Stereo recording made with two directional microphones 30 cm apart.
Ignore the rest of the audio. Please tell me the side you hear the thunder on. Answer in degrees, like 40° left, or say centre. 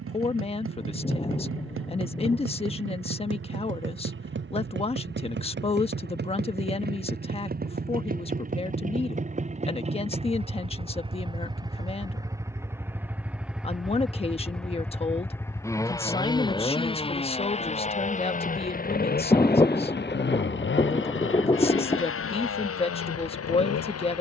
20° left.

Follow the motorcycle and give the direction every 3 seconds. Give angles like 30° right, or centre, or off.
50° right, 40° right, 30° right, 20° right, centre, 10° left, 30° left, 50° left.